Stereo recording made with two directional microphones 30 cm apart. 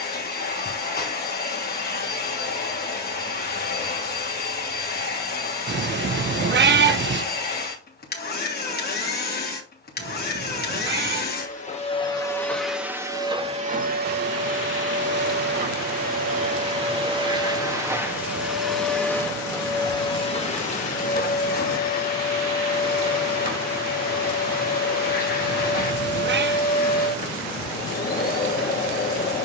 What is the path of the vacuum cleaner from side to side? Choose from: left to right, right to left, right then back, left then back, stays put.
right then back.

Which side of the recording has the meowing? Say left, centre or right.
right.